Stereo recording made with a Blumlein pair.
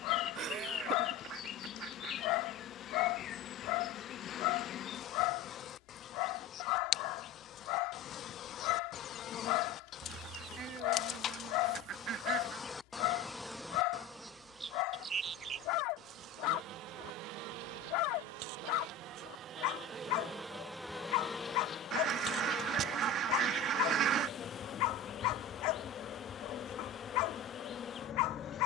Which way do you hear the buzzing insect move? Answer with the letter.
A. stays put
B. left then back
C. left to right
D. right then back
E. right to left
D.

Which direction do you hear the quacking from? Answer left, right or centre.
right.